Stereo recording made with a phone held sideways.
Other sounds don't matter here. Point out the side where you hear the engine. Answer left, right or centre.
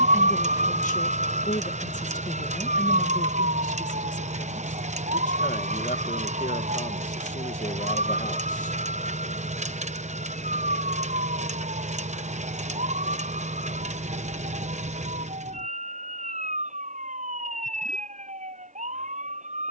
right.